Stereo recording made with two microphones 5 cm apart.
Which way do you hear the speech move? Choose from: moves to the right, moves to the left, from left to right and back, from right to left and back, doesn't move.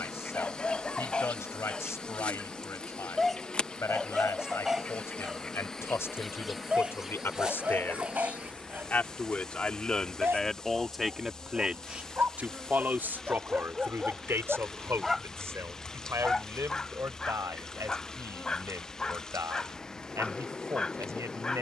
moves to the right.